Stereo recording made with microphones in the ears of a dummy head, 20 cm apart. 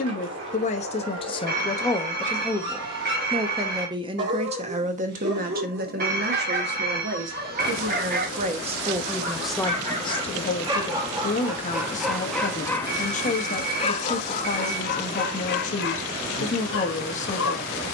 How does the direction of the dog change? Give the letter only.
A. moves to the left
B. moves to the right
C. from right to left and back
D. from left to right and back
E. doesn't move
A.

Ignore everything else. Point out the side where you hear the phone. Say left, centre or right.
right.